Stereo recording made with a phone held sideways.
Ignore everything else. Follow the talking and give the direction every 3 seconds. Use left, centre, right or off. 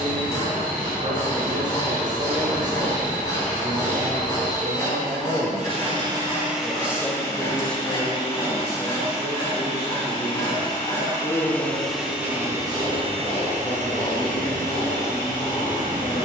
right, right, centre, left, left, left.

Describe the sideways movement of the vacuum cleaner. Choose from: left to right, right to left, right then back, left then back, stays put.
left then back.